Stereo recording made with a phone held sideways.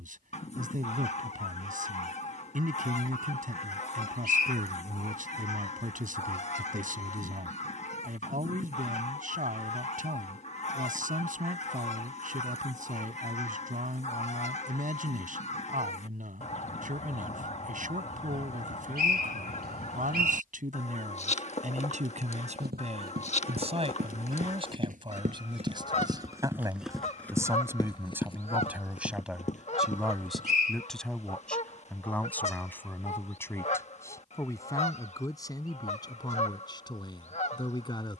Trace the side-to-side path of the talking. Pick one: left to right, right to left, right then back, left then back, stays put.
right to left.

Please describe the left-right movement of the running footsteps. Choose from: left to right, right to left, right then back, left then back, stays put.
right to left.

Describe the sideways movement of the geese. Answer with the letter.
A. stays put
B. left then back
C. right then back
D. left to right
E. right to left
A.